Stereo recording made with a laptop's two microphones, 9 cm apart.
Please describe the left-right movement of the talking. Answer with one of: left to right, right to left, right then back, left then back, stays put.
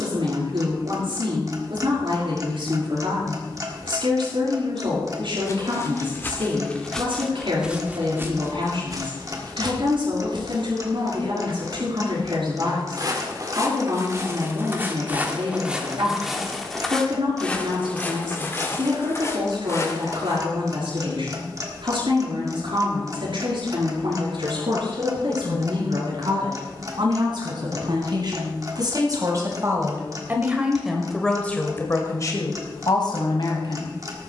right to left.